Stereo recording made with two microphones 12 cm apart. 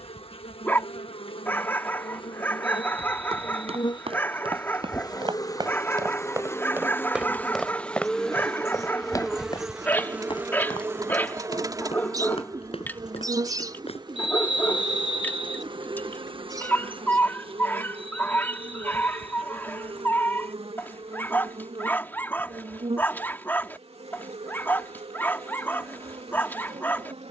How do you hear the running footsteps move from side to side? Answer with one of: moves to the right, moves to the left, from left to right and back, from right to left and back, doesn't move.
moves to the left.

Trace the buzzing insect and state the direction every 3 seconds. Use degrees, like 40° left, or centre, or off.
60° left, 40° left, 10° left, 20° right, 40° right, 50° right, 60° right, 70° right, 70° right.